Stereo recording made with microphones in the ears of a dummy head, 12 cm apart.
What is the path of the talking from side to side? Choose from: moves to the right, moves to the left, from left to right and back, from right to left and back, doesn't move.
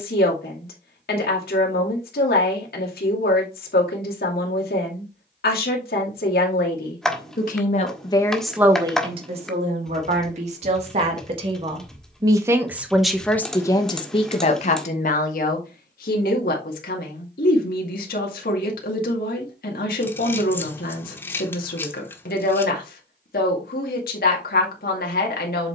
from left to right and back.